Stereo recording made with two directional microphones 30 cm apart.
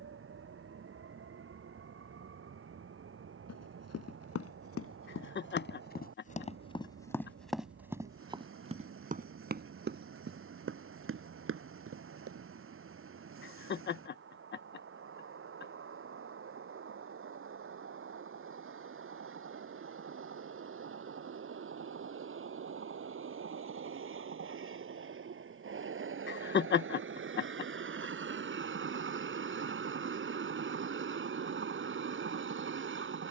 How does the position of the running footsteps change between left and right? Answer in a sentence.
You can hear the running footsteps move to the right.